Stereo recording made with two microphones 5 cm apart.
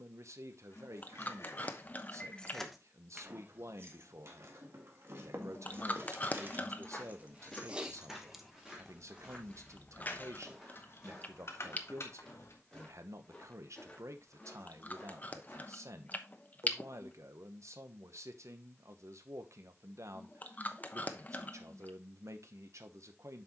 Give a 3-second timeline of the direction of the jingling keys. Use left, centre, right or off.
left, right, right, left, left, off, off, off.